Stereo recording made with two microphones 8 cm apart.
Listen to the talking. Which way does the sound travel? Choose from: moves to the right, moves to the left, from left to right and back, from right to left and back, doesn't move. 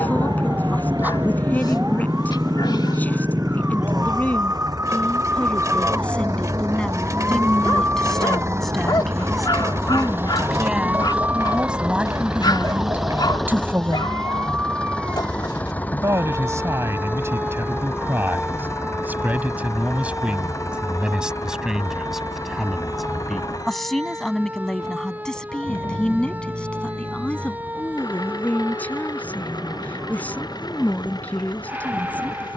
from left to right and back.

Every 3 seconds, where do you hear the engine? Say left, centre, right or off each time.
right, right, right, right, centre, left, left, left, left, left, left.